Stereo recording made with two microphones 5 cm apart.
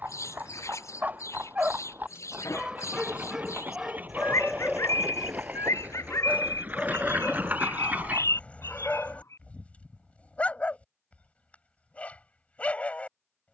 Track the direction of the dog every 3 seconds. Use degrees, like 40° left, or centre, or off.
30° right, centre, 20° left, 20° left, 20° left.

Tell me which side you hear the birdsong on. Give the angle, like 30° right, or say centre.
70° left.